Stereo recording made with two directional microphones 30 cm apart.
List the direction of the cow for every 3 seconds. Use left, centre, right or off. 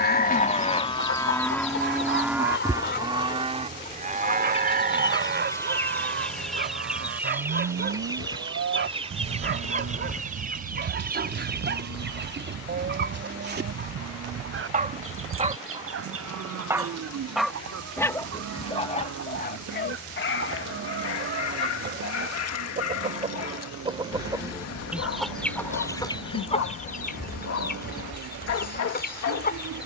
centre, right, right, right, right, right, right, right, right, right.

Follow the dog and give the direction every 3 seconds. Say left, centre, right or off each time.
right, right, right, right, right, centre, left, left, left, left.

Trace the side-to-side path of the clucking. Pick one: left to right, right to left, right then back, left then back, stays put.
right then back.